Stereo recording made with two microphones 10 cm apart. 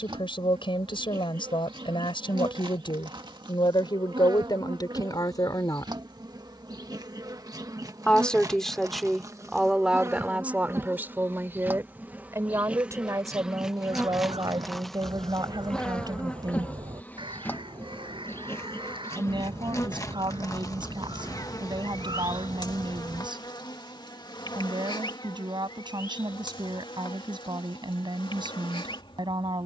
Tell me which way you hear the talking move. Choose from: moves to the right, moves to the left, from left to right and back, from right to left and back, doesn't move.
moves to the right.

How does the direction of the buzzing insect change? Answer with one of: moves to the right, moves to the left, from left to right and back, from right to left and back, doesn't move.
moves to the left.